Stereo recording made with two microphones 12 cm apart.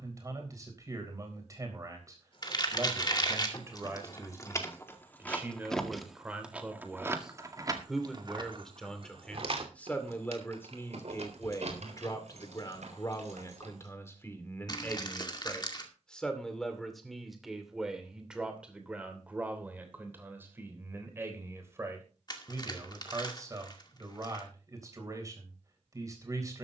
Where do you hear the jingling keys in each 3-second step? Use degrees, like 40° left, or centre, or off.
40° left, 20° left, 30° right, 60° right, 70° right, off, off, off, off.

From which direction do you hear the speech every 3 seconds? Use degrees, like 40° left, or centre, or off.
30° right, 20° right, centre, 20° left, 30° left, centre, 10° right, 20° right, 30° right.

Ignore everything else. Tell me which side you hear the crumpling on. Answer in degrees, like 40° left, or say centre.
40° left.